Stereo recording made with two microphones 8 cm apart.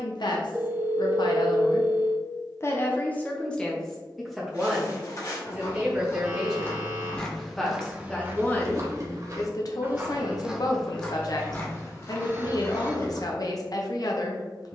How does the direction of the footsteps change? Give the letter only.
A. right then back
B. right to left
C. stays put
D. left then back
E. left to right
A.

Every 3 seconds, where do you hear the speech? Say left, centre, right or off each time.
left, centre, centre, left, left.